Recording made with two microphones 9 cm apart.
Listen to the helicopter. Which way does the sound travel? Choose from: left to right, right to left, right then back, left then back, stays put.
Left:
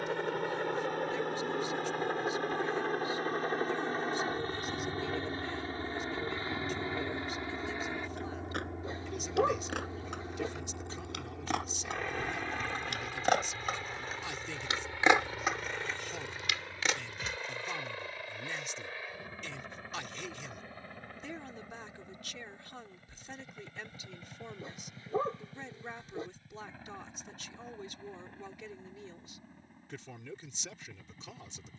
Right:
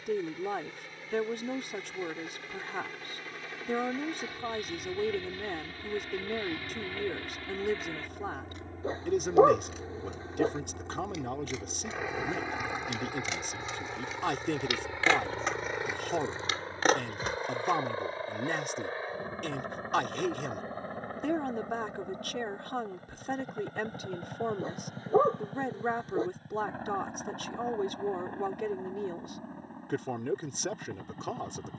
left to right.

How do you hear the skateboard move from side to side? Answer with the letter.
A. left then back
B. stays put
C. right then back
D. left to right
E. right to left
D.